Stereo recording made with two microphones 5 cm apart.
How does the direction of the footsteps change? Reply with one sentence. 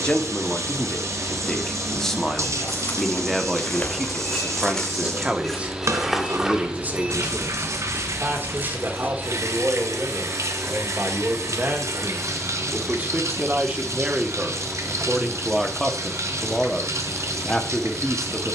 In this clip you hear the footsteps go from the left side to the right.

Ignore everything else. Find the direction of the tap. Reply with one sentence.
In this clip you hear the tap on the right.